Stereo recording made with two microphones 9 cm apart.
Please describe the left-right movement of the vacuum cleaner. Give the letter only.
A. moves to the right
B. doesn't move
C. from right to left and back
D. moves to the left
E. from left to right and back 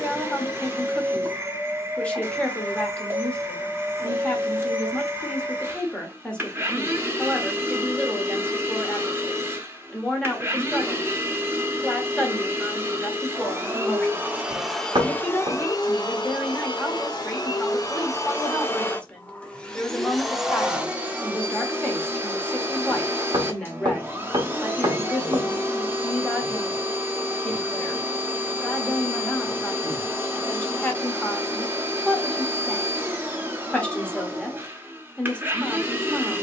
C.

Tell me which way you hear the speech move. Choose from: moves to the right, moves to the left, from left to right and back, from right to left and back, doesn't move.
doesn't move.